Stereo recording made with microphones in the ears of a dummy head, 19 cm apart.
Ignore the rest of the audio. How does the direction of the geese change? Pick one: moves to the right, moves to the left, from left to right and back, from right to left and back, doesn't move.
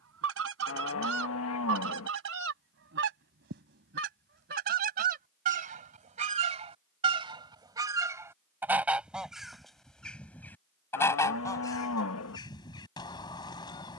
moves to the left.